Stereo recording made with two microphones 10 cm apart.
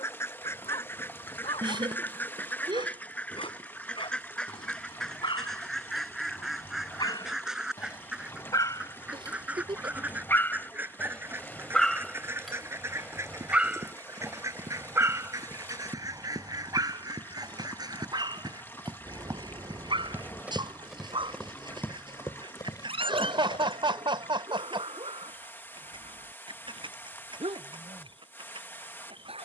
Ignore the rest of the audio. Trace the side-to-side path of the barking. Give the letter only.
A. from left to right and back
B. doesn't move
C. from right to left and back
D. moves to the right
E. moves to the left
D.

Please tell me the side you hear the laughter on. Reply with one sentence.
You can hear the laughter on the right.